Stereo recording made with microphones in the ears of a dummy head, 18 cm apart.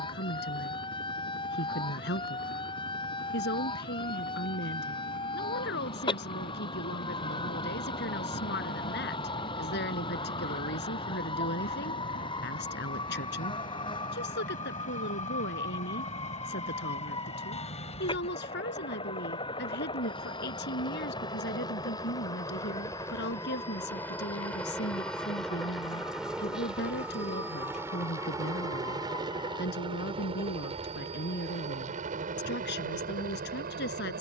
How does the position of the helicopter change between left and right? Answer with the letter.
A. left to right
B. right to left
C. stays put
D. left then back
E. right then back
A.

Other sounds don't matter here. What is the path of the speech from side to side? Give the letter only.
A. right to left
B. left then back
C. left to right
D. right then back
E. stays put
E.